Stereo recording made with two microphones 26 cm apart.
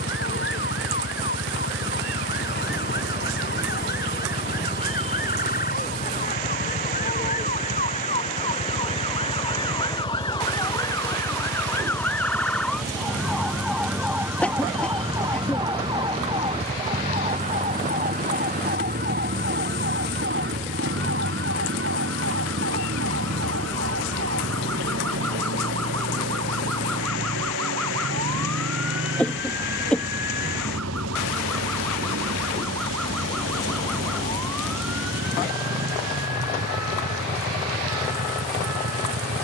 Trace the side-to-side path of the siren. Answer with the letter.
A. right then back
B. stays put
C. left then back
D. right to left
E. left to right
E.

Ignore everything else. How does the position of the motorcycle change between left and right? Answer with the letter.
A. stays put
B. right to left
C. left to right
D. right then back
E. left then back
A.